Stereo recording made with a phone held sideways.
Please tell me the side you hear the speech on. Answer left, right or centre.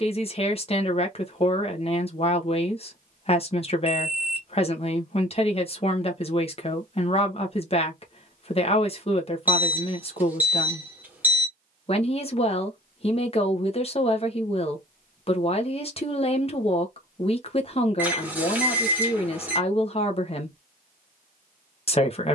left.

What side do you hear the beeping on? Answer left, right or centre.
centre.